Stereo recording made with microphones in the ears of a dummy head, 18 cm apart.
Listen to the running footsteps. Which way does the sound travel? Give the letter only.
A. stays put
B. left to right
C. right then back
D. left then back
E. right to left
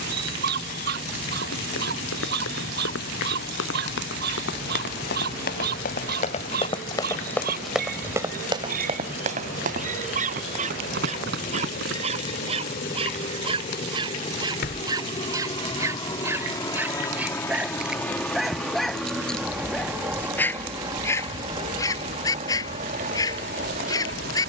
B.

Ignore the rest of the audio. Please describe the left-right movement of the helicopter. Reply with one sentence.
You can hear the helicopter move to the right.